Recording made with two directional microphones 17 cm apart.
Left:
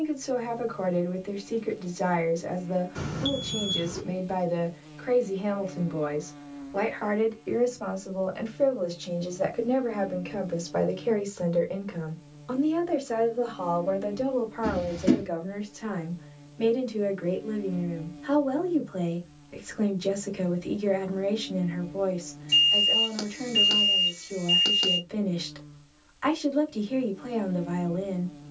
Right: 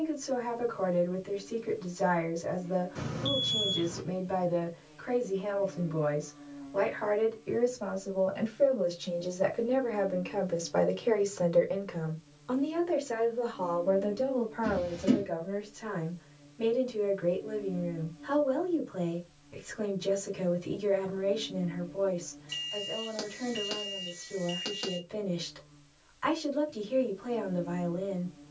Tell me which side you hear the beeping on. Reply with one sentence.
In this clip you hear the beeping on the left.